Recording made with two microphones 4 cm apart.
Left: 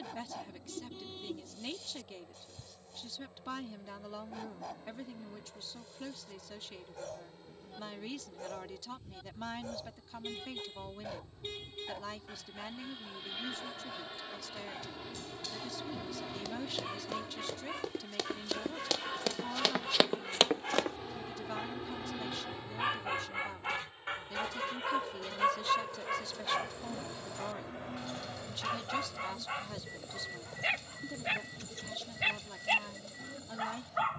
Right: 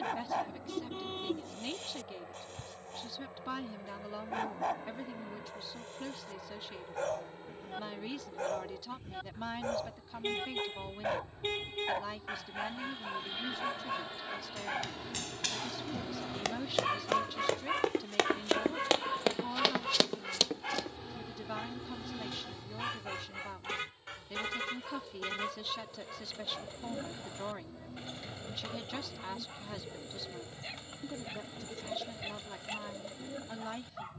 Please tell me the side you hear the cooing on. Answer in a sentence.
You can hear the cooing on the right.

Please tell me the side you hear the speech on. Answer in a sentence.
You can hear the speech in the centre.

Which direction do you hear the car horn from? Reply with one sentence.
You can hear the car horn on the right.